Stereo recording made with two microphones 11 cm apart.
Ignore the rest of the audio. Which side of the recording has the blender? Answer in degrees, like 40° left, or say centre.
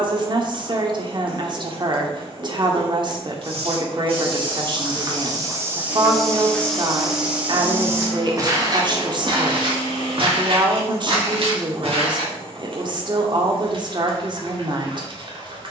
40° right.